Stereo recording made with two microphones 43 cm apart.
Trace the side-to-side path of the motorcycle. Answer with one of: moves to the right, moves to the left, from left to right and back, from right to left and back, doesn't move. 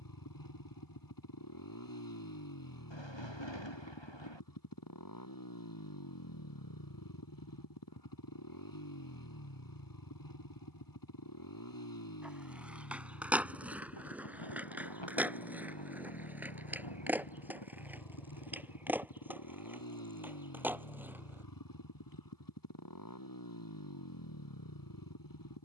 doesn't move.